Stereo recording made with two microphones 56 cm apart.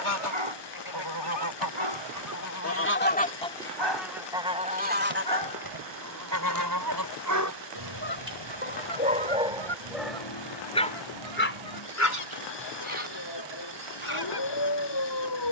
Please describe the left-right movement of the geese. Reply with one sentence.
You can hear the geese move to the right.